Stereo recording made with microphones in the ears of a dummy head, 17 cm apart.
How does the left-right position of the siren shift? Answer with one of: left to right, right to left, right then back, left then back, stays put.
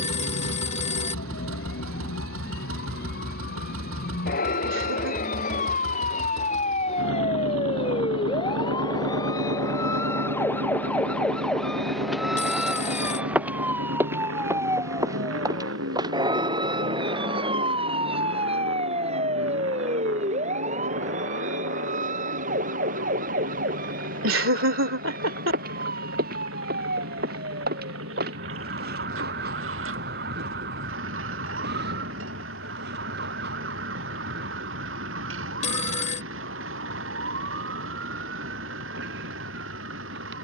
left to right.